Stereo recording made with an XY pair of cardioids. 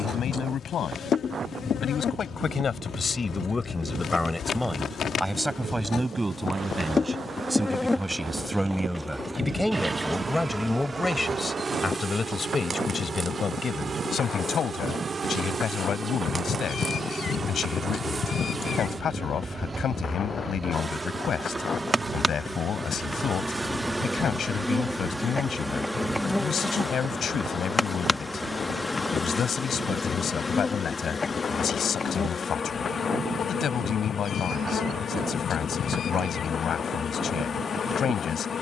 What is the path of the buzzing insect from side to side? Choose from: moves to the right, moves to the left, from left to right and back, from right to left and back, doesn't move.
from left to right and back.